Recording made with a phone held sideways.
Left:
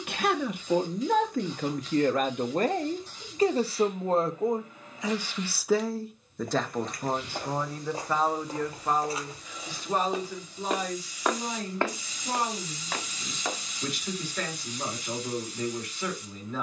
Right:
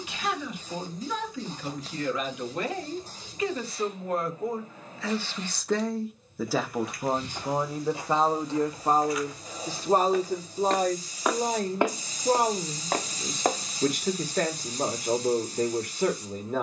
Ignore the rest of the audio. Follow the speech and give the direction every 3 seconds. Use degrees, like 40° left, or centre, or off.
50° left, 20° left, 20° right, 40° right, 50° right, 50° right.